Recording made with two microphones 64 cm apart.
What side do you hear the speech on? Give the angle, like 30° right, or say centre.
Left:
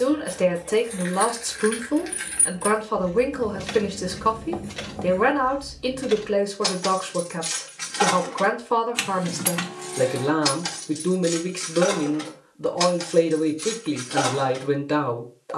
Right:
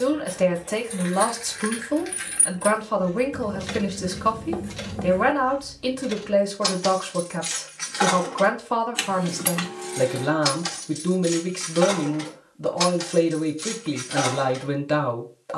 10° right.